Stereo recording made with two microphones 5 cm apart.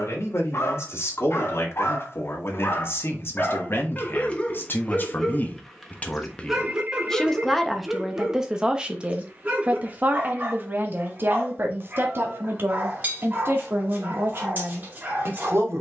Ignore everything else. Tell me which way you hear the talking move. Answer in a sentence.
In this clip you hear the talking move from left to right.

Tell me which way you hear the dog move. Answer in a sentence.
In this clip you hear the dog go from the left side to the right.